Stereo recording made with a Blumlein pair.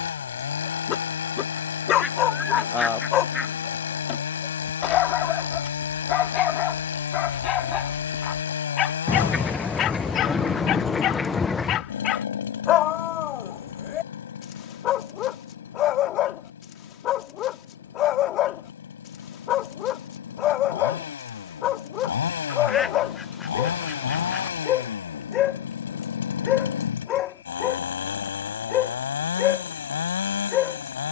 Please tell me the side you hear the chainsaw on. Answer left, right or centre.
left.